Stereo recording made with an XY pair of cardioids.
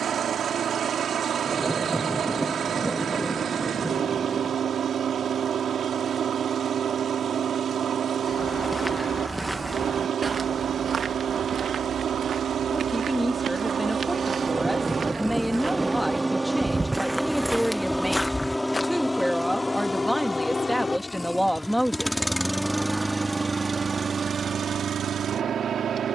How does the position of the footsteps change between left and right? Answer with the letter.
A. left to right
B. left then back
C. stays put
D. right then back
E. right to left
D.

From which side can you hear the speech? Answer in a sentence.
You can hear the speech in the centre.